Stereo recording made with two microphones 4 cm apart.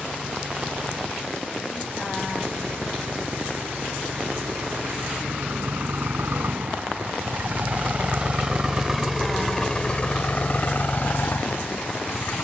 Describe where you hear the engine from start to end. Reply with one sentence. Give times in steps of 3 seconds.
In this clip you hear the engine on the right from 0 s and on the left from 9 s.